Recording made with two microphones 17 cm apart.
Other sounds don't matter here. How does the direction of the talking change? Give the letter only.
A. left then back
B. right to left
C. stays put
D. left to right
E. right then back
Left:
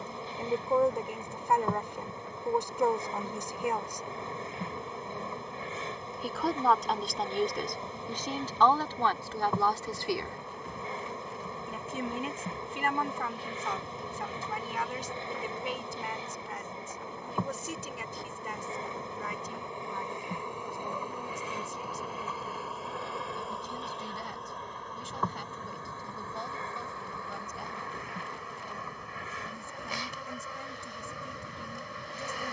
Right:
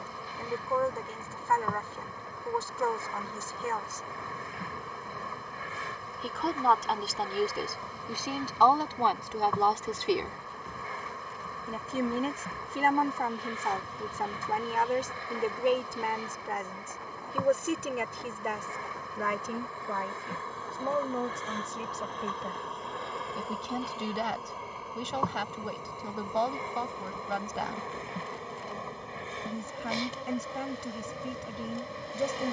D.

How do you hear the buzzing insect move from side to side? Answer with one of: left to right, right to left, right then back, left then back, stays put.
left to right.